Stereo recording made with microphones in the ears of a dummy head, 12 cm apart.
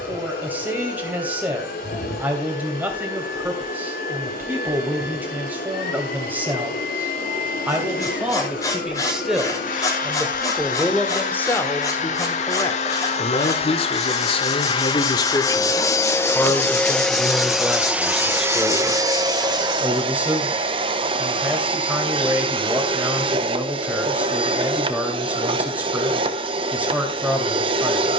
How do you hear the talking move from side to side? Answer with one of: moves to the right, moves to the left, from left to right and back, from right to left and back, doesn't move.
from right to left and back.